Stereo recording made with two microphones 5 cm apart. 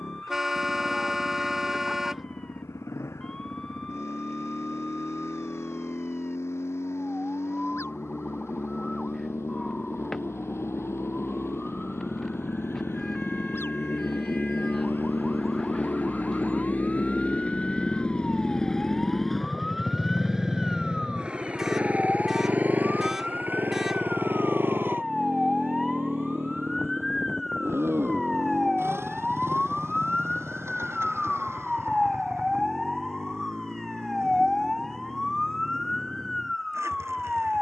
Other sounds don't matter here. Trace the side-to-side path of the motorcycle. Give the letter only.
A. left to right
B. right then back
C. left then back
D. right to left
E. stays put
A.